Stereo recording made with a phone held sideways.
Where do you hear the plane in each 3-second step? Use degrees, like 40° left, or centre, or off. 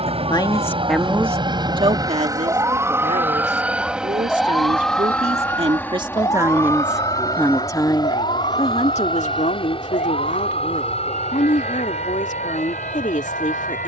30° right, centre, 20° left, 40° left, 40° left.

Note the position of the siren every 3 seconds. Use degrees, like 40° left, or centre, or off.
30° right, centre, 40° left, 60° left, 70° left.